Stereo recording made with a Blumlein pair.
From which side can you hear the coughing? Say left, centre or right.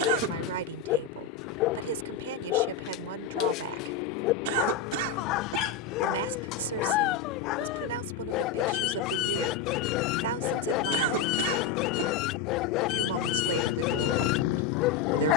right.